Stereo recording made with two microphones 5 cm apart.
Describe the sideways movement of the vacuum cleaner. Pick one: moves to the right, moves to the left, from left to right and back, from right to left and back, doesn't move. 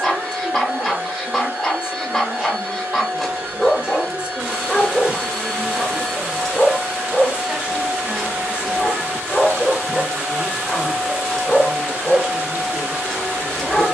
doesn't move.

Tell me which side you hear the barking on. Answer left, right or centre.
centre.